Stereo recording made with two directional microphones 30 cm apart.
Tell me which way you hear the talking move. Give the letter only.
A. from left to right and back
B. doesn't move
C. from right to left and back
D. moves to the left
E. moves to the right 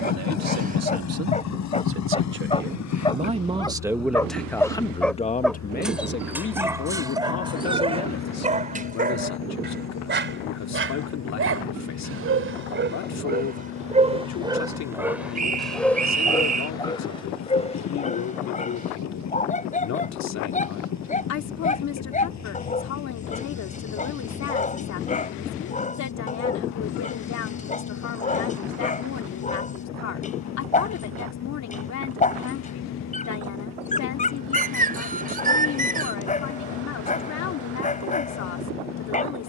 D.